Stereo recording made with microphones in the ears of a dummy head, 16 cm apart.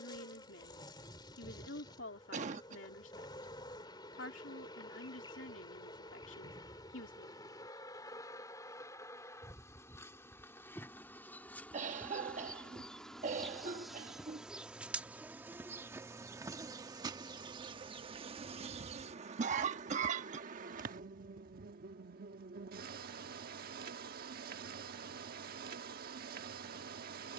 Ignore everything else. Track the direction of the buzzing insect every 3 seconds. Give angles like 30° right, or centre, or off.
30° left, 30° left, 20° left, 10° left, centre, 20° right, 40° right, 60° right, 60° right.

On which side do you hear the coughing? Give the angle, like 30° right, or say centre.
40° right.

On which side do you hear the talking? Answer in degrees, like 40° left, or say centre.
80° left.